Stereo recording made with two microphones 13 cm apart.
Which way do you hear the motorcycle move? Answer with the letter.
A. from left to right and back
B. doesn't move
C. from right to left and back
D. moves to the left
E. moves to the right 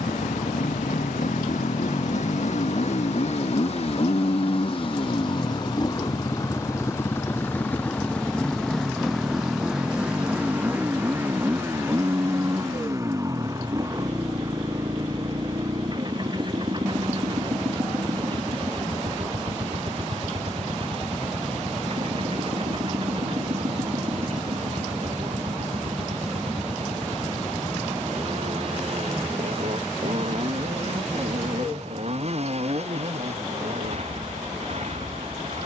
E.